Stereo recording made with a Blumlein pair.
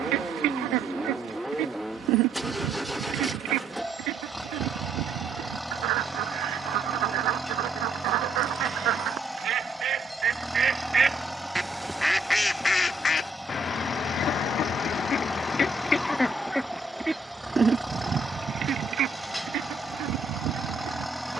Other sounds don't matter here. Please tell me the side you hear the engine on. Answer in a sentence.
You can hear the engine in the centre.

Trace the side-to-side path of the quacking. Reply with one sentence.
You can hear the quacking move from right to left and back again.